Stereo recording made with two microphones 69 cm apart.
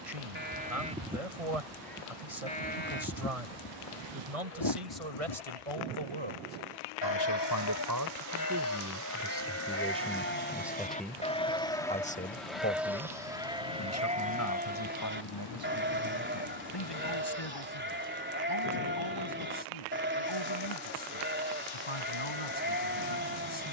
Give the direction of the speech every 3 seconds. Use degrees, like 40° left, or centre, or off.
60° right, 50° right, 30° right, centre, 20° left, 40° left, 40° left, 40° left.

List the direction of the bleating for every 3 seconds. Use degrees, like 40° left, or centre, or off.
centre, 40° left, 30° left, 10° left, 10° right, 20° right, 20° right, 20° right.